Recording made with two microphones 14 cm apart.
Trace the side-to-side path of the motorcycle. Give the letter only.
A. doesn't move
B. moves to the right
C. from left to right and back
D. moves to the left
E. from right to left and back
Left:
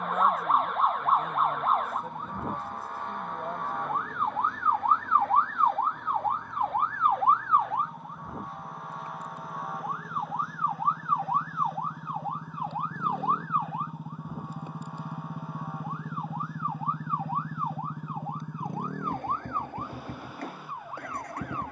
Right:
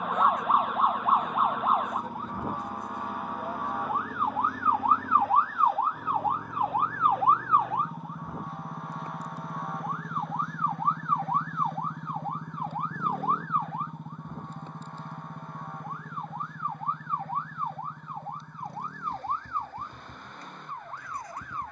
D.